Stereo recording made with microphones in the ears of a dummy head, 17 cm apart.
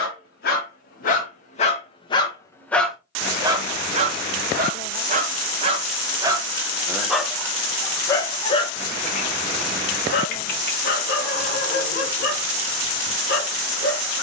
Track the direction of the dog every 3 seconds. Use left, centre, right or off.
left, right, centre, left, left.